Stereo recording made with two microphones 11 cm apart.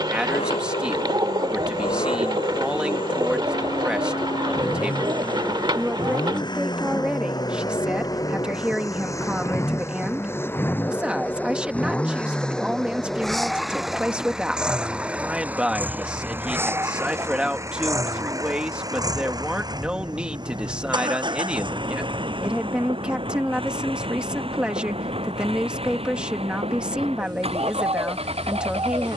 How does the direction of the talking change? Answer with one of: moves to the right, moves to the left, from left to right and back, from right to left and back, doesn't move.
doesn't move.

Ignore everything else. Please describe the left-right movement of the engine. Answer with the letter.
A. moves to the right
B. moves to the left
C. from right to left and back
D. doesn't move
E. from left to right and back
A.